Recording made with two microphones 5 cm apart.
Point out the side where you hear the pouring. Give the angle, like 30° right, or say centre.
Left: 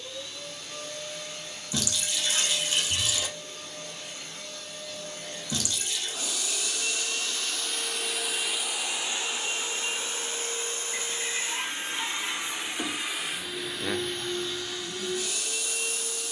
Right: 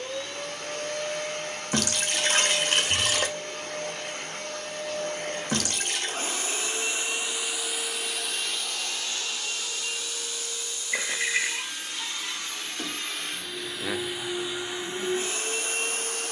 50° right.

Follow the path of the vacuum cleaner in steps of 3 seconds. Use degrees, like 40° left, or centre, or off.
50° right, 50° right, 10° right, 30° left, centre, 40° right.